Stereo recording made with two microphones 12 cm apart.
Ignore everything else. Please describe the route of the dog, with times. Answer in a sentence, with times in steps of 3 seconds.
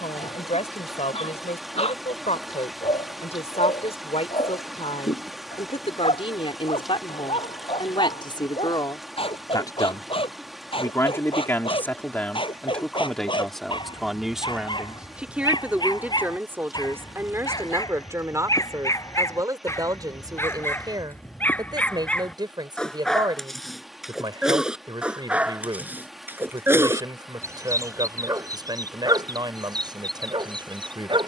You can hear the dog on the left from 0 s, in the centre from 21 s and on the right from 27 s.